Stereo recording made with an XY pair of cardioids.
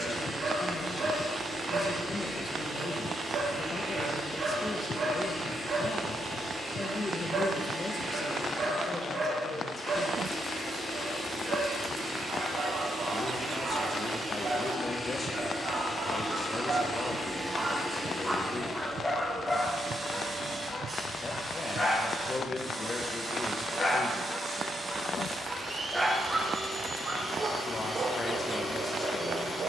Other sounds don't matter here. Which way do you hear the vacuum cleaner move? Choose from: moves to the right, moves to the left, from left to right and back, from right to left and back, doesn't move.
moves to the right.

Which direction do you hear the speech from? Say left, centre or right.
left.